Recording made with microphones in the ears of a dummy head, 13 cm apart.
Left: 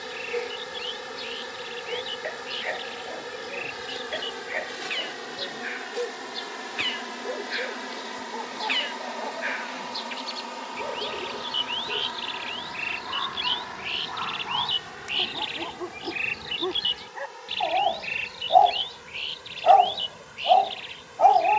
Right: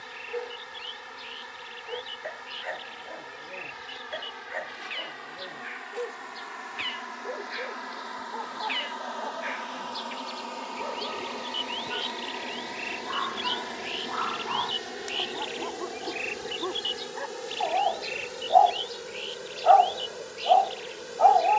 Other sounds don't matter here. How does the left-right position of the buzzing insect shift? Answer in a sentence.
You can hear the buzzing insect go from the left side to the right.